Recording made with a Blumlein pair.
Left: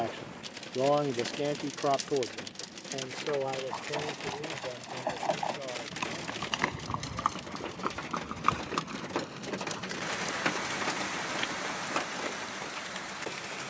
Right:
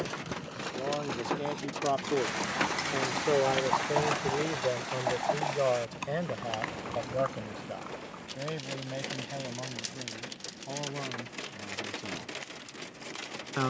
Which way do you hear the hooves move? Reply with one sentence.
In this clip you hear the hooves travel towards the left.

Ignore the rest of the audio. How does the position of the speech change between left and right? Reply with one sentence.
In this clip you hear the speech move from left to right.